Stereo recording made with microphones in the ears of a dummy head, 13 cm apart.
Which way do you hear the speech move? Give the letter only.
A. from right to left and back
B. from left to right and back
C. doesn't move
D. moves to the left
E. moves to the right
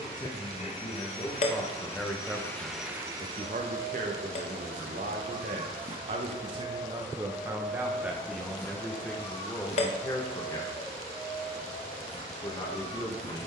B.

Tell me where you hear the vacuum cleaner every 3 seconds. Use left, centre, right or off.
left, right, centre, left, left.